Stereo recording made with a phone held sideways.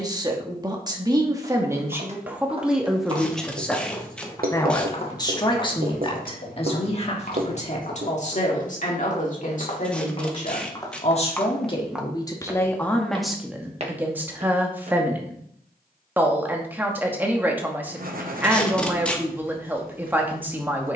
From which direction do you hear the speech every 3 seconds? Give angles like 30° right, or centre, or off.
20° right, 20° left, 40° left, 50° left, centre, 10° right, 10° right.